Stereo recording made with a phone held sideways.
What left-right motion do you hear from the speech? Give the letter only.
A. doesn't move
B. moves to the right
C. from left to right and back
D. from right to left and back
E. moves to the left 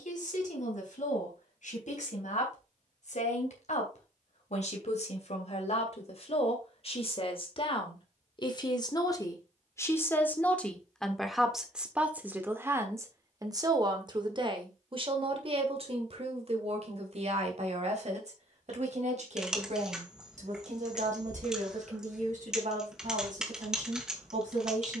B.